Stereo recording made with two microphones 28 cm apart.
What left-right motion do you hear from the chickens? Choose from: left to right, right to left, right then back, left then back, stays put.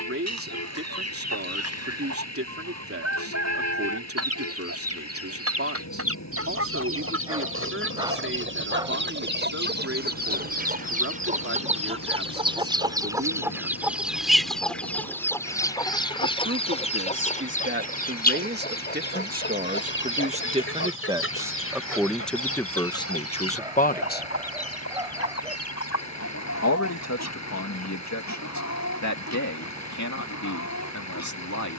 right to left.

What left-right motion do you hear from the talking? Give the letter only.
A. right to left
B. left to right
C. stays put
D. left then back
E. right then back
A.